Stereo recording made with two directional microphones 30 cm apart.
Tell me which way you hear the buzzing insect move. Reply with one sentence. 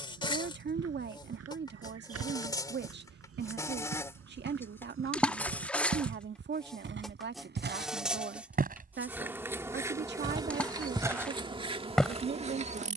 In this clip you hear the buzzing insect travel towards the right.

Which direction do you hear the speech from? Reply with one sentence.
In this clip you hear the speech on the right.